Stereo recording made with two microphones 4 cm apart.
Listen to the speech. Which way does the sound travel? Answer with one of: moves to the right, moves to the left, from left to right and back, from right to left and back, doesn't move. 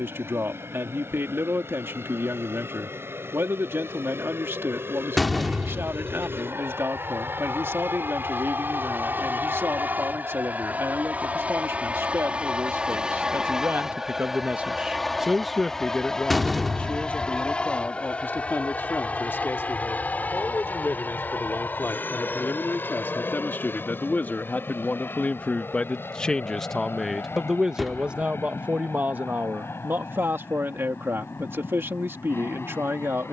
from right to left and back.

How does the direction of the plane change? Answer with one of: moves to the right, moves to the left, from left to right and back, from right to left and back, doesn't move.
moves to the left.